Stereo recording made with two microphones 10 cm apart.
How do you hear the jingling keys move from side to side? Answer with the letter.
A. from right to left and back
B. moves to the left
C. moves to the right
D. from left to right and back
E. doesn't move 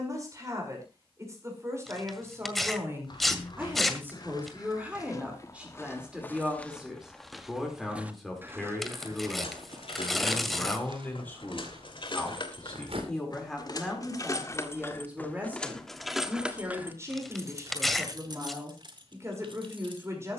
C.